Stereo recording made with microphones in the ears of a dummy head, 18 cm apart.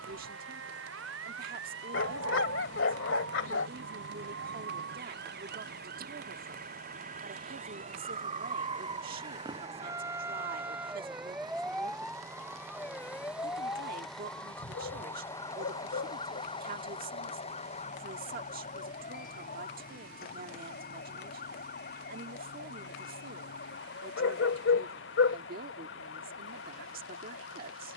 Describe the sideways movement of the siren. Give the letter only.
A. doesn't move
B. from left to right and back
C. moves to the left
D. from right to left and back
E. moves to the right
C.